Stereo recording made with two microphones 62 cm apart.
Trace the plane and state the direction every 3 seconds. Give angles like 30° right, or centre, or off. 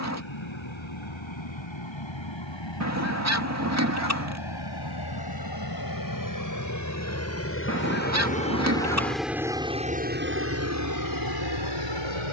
50° left, 40° left, 20° left, 20° right.